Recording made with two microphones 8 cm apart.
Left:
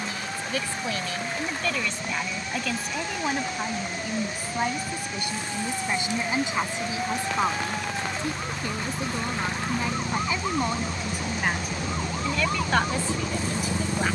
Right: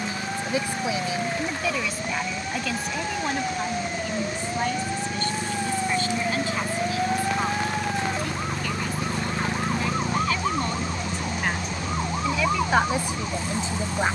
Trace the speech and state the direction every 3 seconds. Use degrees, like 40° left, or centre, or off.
10° right, 10° left, 20° left, 10° left, 20° right.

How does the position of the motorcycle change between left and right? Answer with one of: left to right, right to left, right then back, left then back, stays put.
right to left.